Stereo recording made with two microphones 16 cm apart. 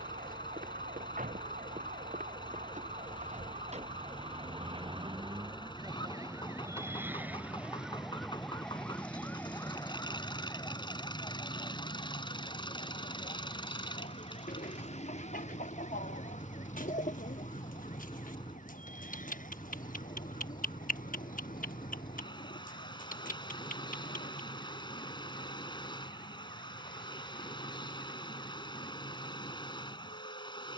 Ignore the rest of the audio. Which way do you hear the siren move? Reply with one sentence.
In this clip you hear the siren move from right to left.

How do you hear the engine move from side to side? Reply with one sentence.
You can hear the engine stay put.